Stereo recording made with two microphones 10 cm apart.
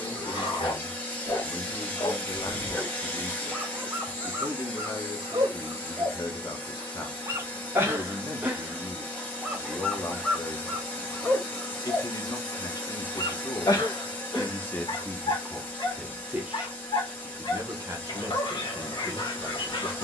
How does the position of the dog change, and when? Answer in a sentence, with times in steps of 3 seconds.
In this clip you hear the dog on the left from 0 s, on the right from 3 s, in the centre from 9 s and on the left from 12 s.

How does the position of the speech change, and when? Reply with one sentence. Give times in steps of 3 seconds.
In this clip you hear the speech on the left from 0 s, in the centre from 15 s and on the right from 18 s.